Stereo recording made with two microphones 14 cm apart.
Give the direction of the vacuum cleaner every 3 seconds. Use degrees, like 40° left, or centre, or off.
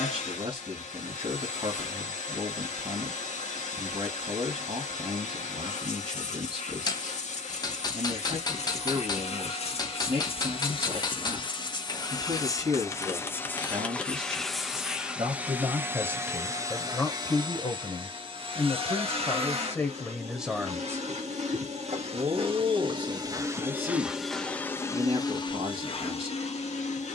60° left, 60° left, 60° left, 40° left, 10° left, 20° right, 50° right, 40° right, 30° left.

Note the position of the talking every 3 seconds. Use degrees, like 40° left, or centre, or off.
50° right, 50° right, 50° right, 50° right, 50° right, centre, 20° left, 50° right, 50° right.